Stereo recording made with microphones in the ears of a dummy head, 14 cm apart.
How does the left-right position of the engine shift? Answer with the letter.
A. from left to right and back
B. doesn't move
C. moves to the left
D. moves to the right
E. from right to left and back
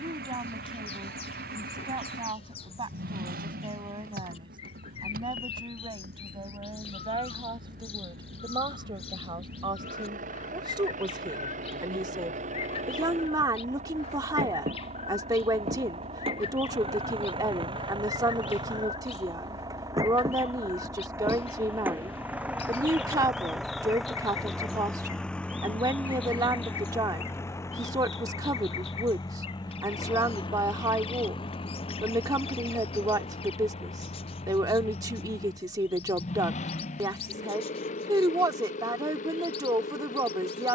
C.